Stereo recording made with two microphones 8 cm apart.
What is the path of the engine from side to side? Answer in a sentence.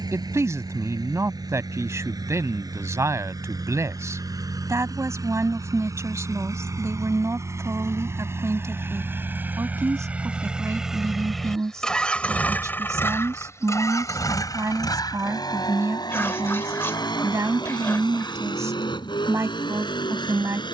In this clip you hear the engine move from right to left.